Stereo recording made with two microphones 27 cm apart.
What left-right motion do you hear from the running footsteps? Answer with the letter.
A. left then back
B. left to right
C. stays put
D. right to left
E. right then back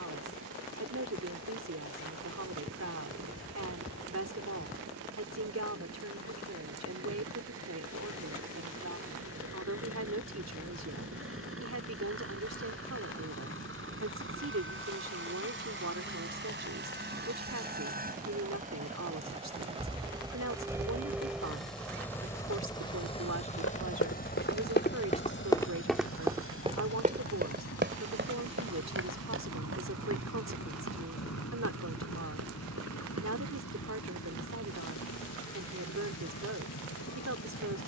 B.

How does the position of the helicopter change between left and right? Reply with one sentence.
You can hear the helicopter move from right to left.